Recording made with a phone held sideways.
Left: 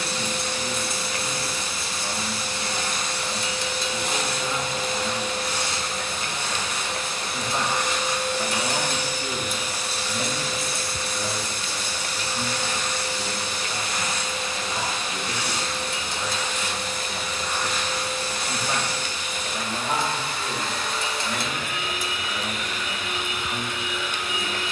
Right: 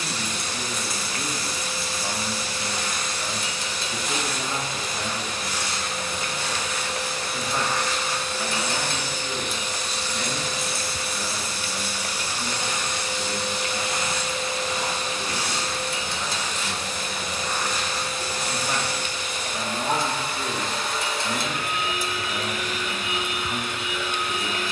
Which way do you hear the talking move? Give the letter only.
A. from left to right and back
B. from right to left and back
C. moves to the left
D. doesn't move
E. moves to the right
B.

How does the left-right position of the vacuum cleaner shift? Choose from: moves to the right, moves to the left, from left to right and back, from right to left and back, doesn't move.
moves to the right.